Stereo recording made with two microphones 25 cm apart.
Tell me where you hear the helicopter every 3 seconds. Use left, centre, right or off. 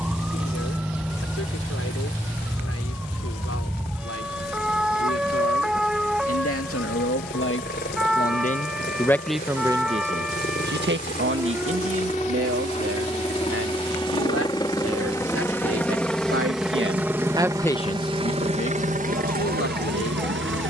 left, left, left, left, left, centre, right.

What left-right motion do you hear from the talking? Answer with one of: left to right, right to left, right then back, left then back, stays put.
right then back.